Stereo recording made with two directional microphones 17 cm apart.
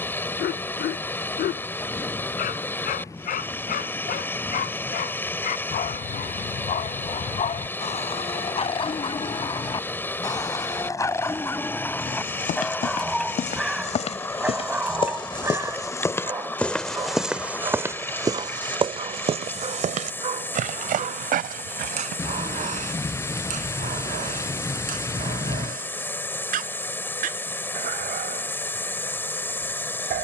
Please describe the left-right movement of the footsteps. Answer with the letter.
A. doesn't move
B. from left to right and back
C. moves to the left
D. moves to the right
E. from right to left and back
D.